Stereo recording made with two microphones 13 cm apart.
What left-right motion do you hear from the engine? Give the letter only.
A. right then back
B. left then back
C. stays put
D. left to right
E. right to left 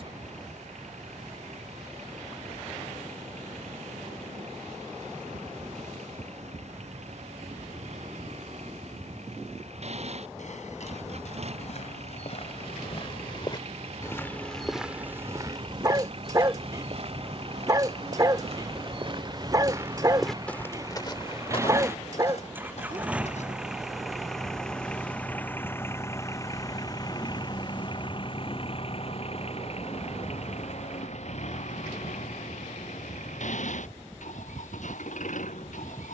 E.